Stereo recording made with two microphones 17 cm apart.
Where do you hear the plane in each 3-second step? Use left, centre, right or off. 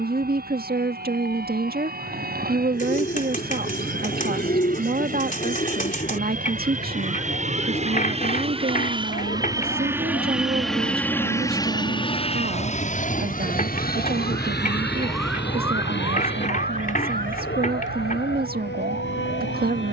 right, right, right, centre, left, left, left.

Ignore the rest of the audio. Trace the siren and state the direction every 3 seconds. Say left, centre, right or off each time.
left, left, left, left, left, right, right.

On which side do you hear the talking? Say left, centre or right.
right.